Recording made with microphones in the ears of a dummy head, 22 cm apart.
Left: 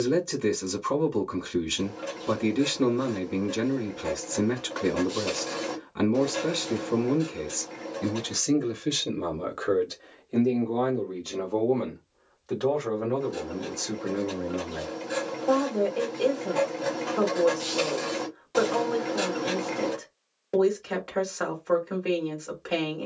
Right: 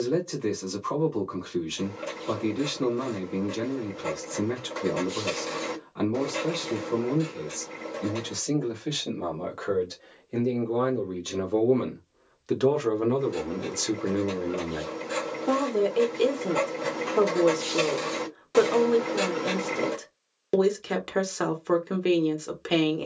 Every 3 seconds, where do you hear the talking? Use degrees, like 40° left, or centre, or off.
30° left, 30° left, 30° left, centre, 40° right, 50° right, 50° right, 50° right.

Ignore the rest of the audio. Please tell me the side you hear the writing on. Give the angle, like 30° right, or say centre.
10° right.